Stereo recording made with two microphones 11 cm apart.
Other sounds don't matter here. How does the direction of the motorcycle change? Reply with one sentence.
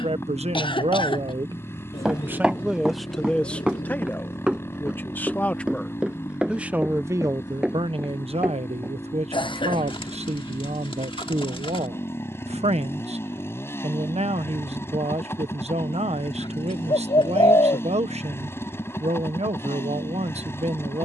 In this clip you hear the motorcycle stay put.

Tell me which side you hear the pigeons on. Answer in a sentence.
You can hear the pigeons on the left.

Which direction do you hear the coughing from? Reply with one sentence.
In this clip you hear the coughing on the left.